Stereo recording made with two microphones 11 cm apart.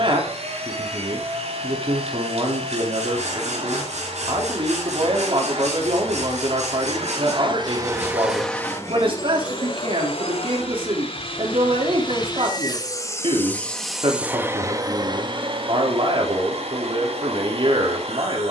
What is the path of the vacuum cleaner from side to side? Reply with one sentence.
In this clip you hear the vacuum cleaner move from right to left and back again.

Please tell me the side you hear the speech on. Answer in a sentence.
In this clip you hear the speech on the right.